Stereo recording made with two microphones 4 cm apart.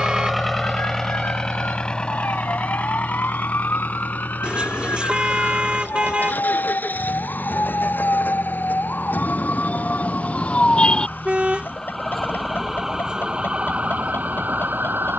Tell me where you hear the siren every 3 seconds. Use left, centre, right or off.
left, left, left, left, right.